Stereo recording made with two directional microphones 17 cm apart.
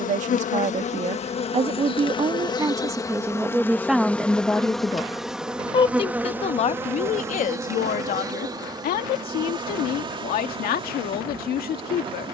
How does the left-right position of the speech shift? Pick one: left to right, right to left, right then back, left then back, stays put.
right to left.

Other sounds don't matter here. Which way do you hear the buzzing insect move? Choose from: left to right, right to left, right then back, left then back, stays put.
left to right.